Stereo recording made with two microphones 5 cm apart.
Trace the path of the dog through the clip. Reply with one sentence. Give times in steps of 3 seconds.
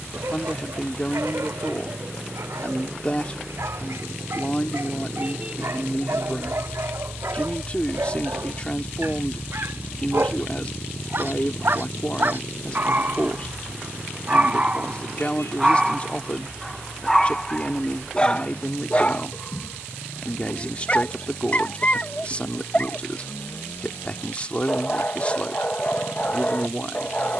In this clip you hear the dog on the right from 0 s, in the centre from 15 s and on the left from 18 s.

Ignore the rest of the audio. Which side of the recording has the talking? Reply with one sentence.
You can hear the talking on the left.